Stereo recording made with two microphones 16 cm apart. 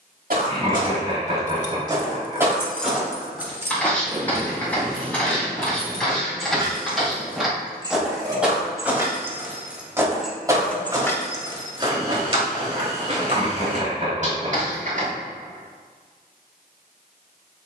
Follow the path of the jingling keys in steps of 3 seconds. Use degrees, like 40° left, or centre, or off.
20° left, 30° right, 30° right, 10° left, off, off.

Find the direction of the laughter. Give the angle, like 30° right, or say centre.
40° right.